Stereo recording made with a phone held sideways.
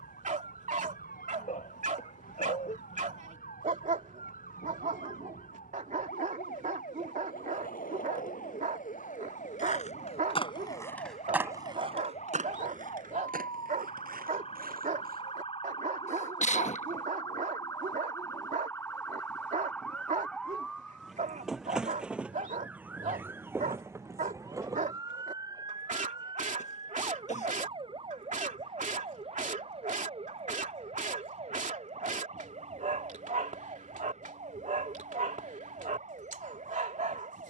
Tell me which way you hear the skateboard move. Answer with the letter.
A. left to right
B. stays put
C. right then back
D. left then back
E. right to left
A.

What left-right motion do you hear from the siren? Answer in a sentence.
In this clip you hear the siren move to the right.